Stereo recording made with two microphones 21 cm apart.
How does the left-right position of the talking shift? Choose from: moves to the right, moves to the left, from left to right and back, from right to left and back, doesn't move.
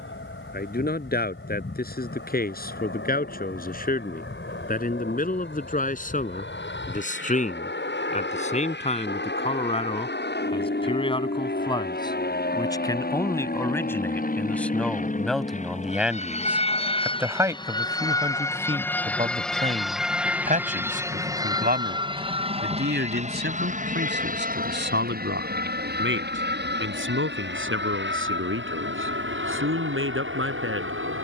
moves to the right.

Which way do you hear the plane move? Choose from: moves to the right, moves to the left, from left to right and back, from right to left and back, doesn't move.
moves to the right.